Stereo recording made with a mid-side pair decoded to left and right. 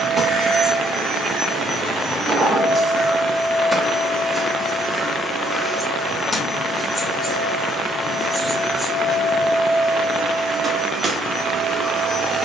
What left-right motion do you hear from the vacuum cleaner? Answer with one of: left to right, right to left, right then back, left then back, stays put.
left then back.